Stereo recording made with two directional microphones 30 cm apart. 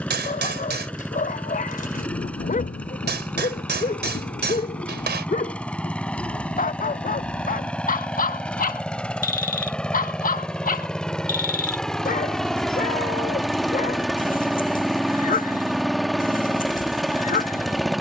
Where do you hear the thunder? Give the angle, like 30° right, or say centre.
30° left.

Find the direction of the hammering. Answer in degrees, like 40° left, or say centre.
30° right.